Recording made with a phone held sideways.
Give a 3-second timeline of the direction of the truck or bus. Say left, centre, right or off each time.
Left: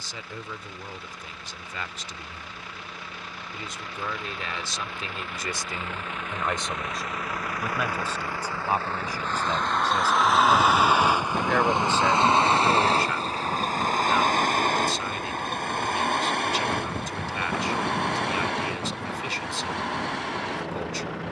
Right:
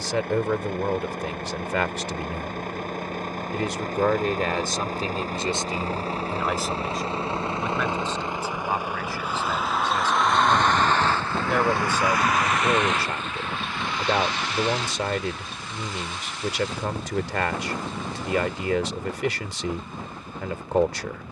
right, right, right, centre, left, left, left.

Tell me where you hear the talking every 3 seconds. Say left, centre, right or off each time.
right, right, centre, centre, right, right, right.